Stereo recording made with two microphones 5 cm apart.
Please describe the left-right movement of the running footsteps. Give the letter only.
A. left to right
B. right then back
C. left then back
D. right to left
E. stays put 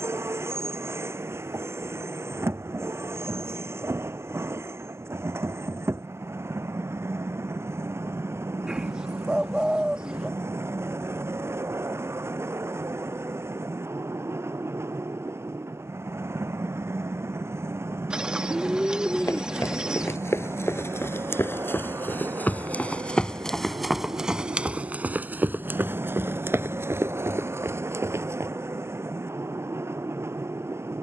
A.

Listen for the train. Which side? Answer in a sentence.
In this clip you hear the train on the right.